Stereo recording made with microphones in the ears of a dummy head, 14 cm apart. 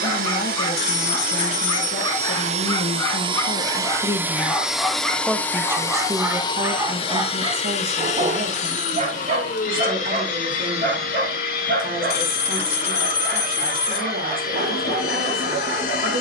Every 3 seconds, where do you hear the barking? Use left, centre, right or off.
left, centre, right, right, right, right.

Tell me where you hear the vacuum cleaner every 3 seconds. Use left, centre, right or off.
right, centre, left, left, left, left.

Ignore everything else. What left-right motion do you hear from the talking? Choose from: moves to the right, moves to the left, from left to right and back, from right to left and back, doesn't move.
moves to the right.